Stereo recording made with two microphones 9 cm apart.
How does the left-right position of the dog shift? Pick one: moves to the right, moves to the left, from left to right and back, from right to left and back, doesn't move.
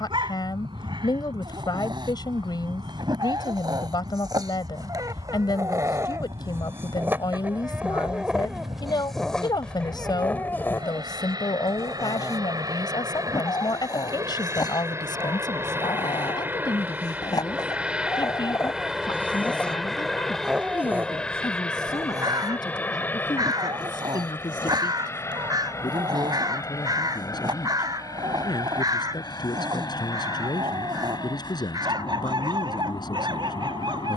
from right to left and back.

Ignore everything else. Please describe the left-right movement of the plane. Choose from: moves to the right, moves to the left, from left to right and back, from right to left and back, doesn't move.
moves to the left.